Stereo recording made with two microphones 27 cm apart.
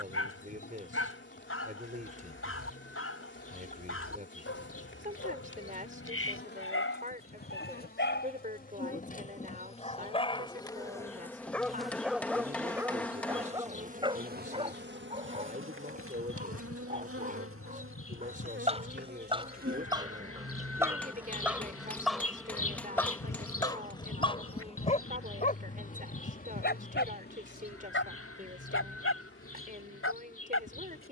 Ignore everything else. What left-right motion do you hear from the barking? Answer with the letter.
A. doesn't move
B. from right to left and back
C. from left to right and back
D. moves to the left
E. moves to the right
C.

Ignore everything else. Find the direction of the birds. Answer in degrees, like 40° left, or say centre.
60° left.